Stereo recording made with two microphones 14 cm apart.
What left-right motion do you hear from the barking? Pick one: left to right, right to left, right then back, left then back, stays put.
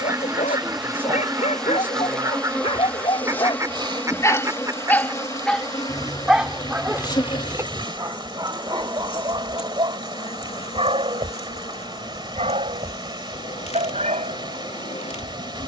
left to right.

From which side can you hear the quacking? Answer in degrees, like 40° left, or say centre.
20° right.